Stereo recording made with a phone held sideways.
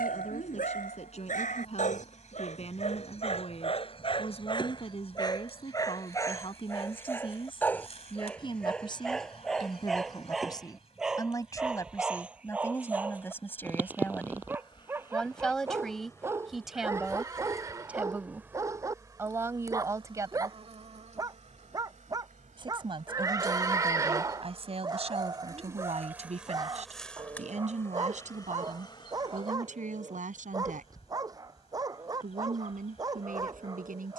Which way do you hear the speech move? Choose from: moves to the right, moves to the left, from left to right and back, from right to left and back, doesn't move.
moves to the right.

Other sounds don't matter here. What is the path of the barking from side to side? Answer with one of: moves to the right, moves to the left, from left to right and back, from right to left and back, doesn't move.
moves to the right.